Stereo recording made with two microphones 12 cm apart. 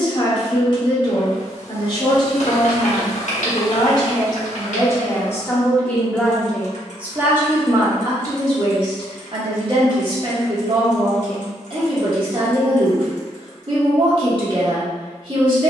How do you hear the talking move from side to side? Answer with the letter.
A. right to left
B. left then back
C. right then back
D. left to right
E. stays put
D.